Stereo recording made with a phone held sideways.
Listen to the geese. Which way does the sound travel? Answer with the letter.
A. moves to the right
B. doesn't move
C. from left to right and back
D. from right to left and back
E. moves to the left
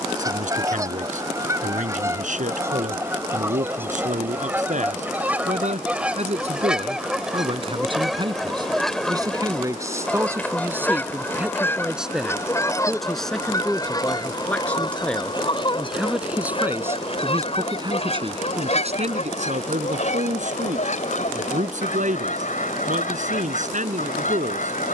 E.